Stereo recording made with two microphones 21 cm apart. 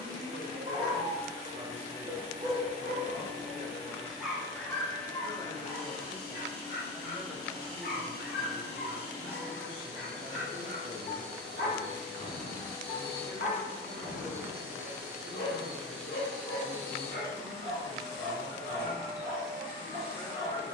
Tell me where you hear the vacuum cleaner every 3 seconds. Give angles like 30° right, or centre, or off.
20° left, 20° left, 20° left, 20° left, 10° left, 10° left, 20° left.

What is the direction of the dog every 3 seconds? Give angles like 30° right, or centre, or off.
30° right, 10° left, 50° left, 50° left, 50° left, 50° left, 50° left.